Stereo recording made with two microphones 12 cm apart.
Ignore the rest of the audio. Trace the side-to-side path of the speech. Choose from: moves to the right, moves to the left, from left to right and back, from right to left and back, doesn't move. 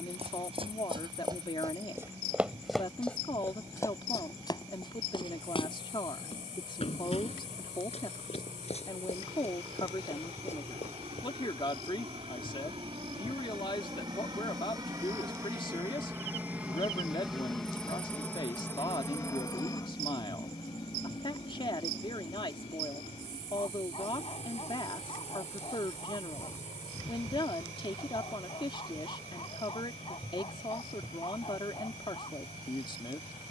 doesn't move.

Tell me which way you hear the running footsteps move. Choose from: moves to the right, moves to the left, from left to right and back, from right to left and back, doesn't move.
moves to the left.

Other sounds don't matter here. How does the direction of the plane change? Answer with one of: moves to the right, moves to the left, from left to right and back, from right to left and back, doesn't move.
moves to the left.